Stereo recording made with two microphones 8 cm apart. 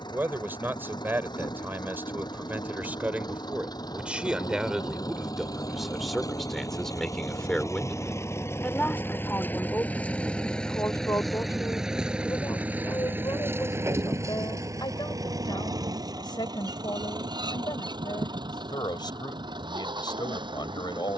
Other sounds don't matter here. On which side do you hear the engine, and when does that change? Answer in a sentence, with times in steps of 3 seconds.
In this clip you hear the engine on the left from 0 s, in the centre from 9 s and on the right from 12 s.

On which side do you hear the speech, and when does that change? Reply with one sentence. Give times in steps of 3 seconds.
You can hear the speech on the right from 0 s, in the centre from 3 s and on the left from 9 s.